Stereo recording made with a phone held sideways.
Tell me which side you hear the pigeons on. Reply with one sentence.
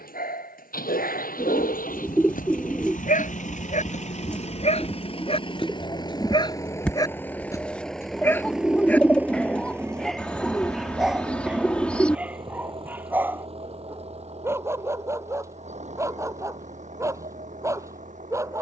You can hear the pigeons in the centre.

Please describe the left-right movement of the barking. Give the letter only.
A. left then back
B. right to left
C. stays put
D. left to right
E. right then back
D.